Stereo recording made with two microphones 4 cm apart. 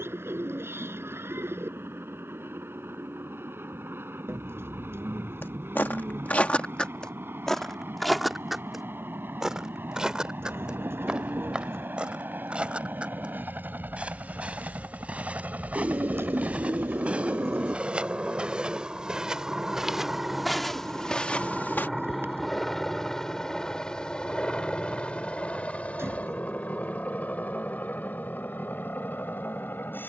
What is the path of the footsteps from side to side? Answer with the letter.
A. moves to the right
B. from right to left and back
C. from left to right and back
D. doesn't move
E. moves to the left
C.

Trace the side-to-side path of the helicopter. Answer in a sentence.
In this clip you hear the helicopter move from right to left.